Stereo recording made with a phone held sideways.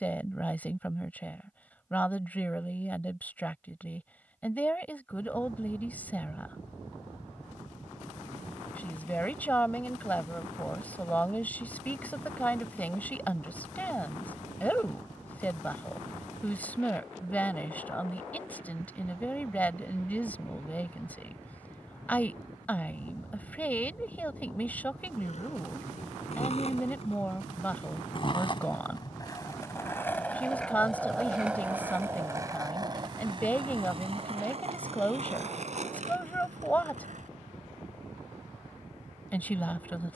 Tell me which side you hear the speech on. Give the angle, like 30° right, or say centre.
10° left.